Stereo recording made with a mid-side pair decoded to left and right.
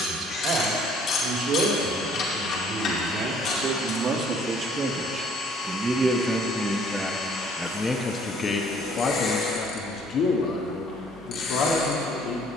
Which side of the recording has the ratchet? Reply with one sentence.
You can hear the ratchet on the left.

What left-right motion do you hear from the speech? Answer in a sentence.
You can hear the speech move from right to left.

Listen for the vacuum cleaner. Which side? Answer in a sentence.
In this clip you hear the vacuum cleaner on the left.